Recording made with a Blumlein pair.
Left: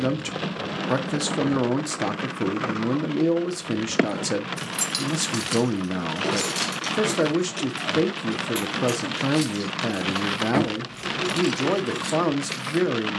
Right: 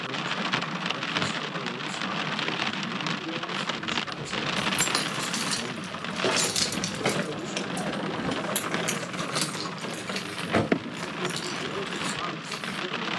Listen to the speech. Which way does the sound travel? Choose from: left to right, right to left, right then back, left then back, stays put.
stays put.